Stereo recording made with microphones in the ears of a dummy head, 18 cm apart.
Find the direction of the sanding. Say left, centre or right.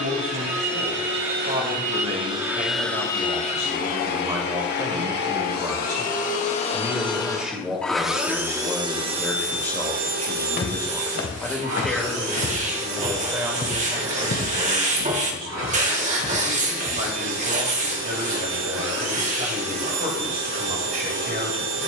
right.